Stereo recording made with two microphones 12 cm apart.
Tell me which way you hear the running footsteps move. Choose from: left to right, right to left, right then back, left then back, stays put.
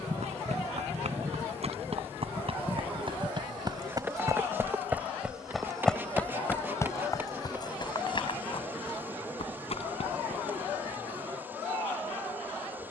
right to left.